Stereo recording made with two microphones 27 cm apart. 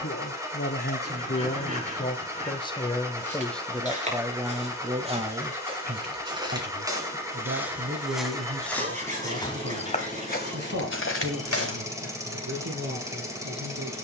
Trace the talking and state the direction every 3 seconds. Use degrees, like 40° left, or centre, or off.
30° left, 10° right, 50° right, 60° right, 70° right.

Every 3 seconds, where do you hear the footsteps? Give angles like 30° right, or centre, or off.
off, 20° right, 10° right, 40° left, off.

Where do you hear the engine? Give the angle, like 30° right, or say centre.
10° right.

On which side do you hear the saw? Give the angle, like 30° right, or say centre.
30° right.